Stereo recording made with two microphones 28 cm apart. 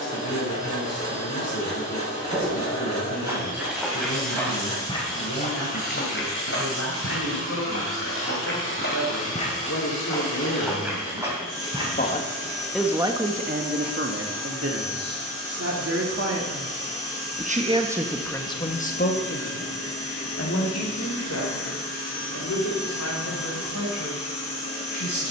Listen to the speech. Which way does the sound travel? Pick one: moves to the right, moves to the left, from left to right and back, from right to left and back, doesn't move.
from left to right and back.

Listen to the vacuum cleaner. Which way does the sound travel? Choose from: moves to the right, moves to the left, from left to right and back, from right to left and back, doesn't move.
doesn't move.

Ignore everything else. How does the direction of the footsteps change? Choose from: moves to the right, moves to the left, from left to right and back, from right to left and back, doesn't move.
from right to left and back.